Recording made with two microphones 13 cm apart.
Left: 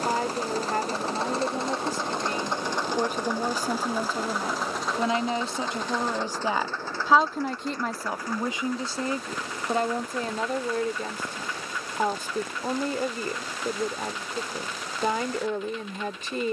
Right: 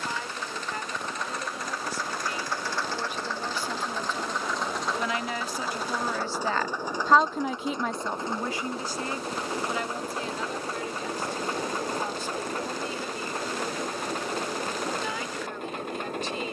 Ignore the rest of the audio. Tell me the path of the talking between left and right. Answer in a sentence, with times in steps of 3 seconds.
In this clip you hear the talking on the left from 0 s, in the centre from 6 s and on the left from 9 s.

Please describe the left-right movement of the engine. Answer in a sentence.
In this clip you hear the engine travel towards the right.